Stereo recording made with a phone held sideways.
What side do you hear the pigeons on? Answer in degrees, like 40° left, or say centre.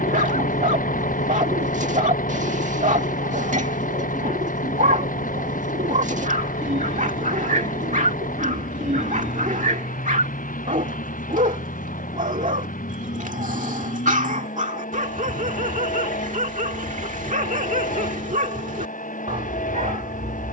70° right.